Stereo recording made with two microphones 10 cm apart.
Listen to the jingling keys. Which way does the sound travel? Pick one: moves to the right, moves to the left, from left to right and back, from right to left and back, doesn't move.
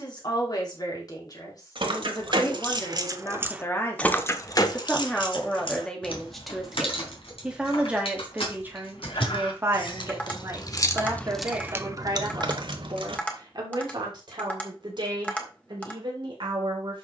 from right to left and back.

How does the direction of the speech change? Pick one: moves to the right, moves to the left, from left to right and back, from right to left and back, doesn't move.
moves to the right.